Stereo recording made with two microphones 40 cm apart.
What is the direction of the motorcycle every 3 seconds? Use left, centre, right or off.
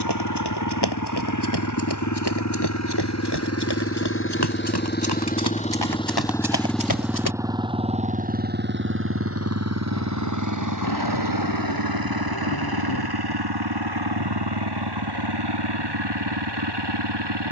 left, left, centre, right, right, right.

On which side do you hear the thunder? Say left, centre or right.
left.